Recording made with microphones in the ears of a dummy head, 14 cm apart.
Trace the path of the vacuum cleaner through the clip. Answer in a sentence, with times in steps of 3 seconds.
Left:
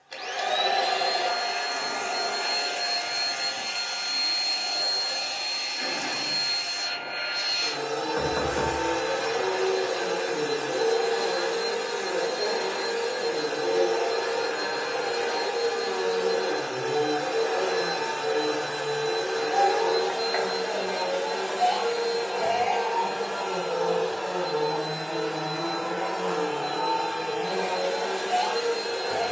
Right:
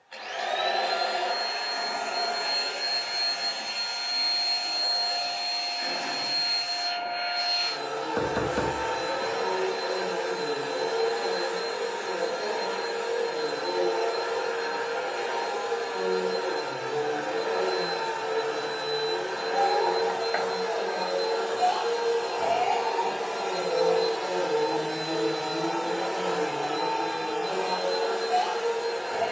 In this clip you hear the vacuum cleaner on the left from 0 s, in the centre from 21 s, on the right from 24 s and on the left from 27 s.